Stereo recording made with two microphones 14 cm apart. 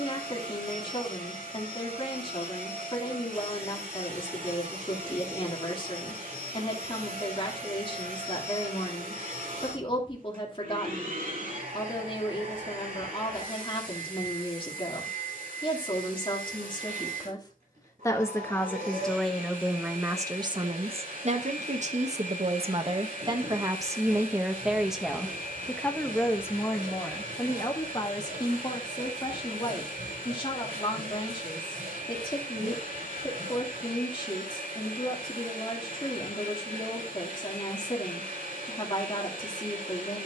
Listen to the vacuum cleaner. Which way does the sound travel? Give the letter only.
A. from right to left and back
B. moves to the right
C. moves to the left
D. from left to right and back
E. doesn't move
E.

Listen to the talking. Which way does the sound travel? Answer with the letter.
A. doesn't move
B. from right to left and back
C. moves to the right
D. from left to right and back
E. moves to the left
D.